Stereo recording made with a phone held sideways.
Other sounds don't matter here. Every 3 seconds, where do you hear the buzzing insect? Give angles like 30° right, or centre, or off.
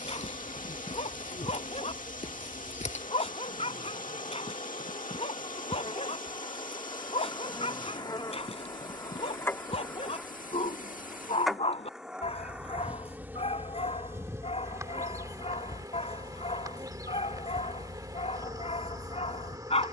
50° left, 50° left, 30° left, 10° left, 10° right, 30° right, 30° right.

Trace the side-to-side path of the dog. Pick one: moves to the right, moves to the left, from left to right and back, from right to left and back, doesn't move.
doesn't move.